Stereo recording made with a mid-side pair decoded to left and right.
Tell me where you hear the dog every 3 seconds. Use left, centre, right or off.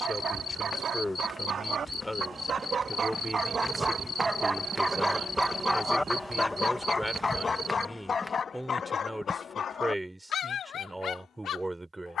right, right, left, left.